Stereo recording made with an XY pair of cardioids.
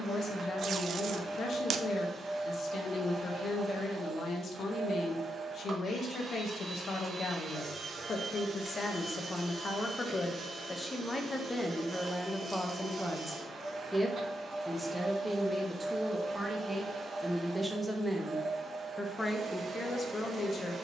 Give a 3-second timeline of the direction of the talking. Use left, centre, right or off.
left, left, left, left, centre, centre, left.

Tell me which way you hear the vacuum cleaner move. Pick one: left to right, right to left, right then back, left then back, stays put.
stays put.